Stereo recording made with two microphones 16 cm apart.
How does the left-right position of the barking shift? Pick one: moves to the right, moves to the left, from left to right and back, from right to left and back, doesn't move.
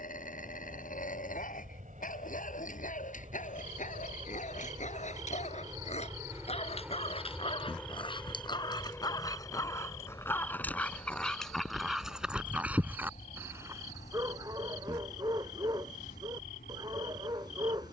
moves to the right.